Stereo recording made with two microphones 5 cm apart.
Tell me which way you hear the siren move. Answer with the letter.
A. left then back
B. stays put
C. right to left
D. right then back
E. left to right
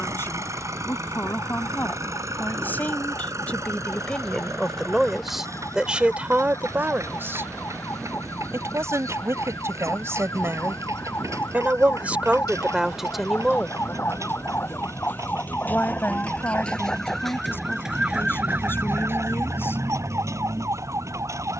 E.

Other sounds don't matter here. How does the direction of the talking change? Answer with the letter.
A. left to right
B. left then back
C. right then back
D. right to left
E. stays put
C.